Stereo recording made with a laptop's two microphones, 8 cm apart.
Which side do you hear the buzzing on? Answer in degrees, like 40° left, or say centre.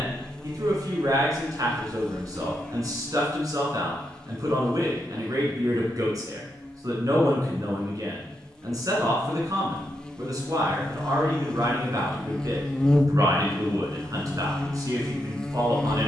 10° left.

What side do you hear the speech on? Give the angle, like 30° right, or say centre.
50° right.